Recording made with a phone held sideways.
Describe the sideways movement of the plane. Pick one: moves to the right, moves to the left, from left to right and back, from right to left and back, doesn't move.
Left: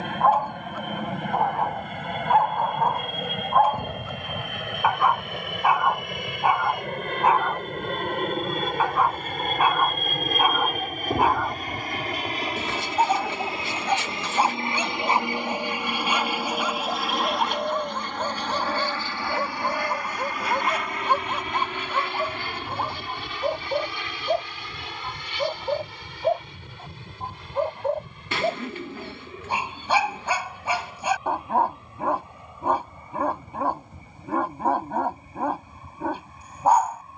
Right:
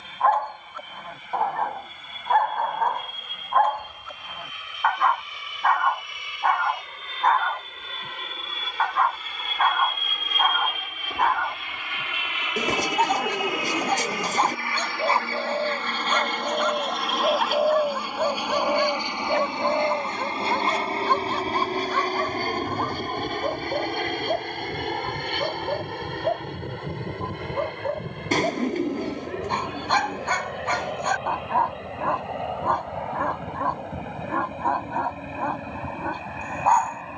moves to the right.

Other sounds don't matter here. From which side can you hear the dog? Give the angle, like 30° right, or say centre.
10° left.